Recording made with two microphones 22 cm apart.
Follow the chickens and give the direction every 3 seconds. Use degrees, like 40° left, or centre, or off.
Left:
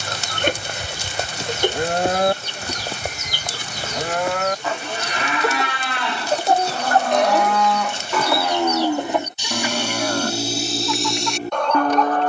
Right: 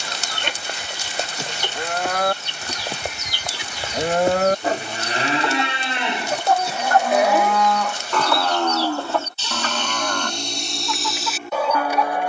50° left, 50° left, 30° left, 10° left.